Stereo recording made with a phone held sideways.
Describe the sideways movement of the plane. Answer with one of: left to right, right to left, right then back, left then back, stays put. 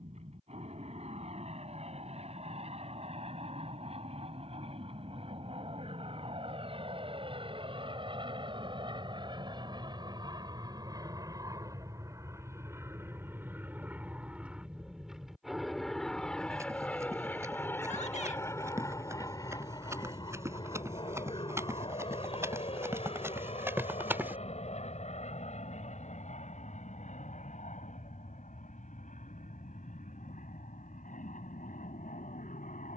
right to left.